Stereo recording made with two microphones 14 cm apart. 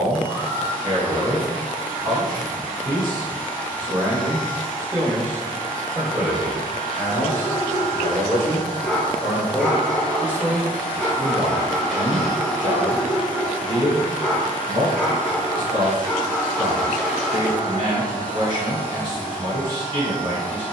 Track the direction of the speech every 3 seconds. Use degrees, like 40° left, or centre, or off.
40° right, 20° right, 10° left, 10° right, 40° right, 40° right, 40° right.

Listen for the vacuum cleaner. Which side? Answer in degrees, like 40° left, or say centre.
10° left.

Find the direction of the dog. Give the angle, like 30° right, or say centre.
centre.